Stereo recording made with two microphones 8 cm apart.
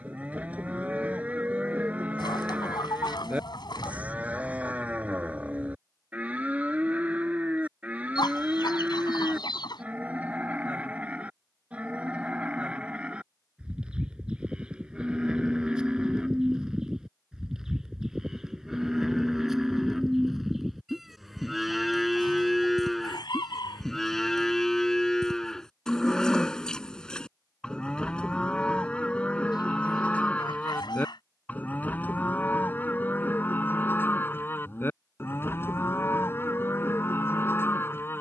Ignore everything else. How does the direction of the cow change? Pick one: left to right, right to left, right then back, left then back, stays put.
right to left.